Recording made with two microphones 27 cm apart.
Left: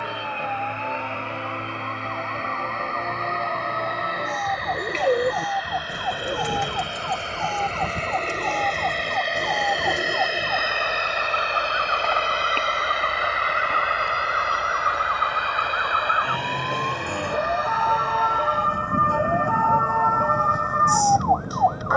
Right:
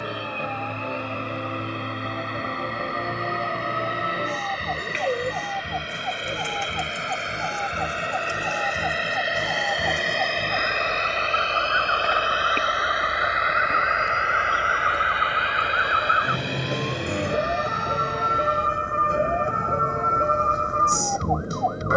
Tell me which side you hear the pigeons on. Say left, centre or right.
left.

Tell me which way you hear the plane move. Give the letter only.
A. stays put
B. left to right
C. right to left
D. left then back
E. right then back
C.